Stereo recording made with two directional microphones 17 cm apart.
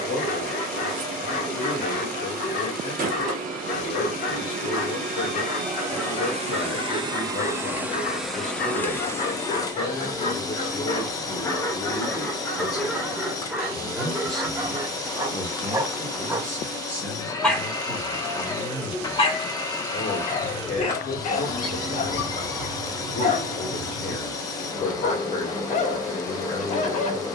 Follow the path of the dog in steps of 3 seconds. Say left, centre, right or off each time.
left, left, left, left, centre, centre, left, left, left.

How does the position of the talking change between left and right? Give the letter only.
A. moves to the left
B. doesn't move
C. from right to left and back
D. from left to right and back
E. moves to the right
D.